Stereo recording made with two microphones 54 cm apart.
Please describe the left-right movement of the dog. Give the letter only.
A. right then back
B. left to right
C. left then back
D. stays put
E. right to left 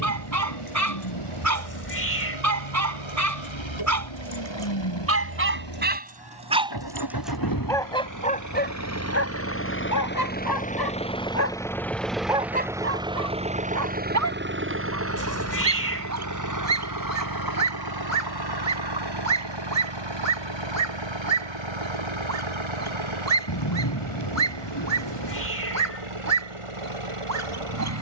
C.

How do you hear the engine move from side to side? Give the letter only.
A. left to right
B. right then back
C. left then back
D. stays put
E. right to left
A.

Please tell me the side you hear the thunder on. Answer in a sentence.
You can hear the thunder on the left.